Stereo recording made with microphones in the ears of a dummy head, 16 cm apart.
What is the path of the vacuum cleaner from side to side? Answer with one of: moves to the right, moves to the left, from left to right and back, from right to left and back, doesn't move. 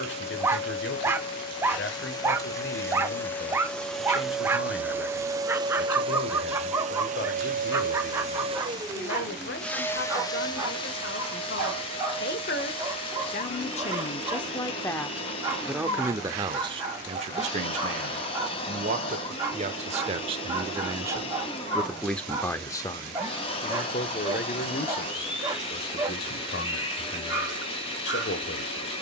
from left to right and back.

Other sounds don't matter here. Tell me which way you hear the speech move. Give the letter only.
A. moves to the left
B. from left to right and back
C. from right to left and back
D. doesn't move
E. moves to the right
B.